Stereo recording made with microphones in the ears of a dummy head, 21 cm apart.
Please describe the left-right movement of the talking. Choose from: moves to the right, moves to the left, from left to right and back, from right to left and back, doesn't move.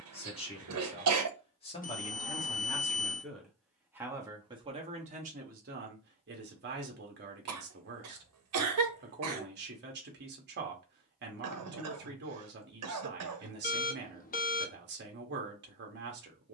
moves to the right.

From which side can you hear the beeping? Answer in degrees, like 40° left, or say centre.
40° left.